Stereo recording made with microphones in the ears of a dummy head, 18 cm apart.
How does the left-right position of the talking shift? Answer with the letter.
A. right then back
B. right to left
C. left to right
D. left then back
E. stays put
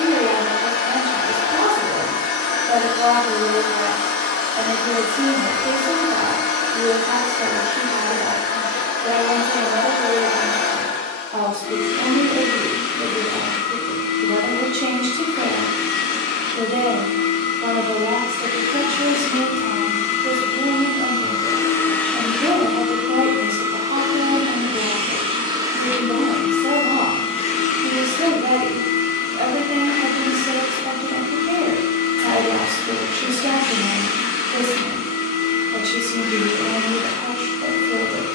E.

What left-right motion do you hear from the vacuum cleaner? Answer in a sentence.
In this clip you hear the vacuum cleaner move from left to right and back again.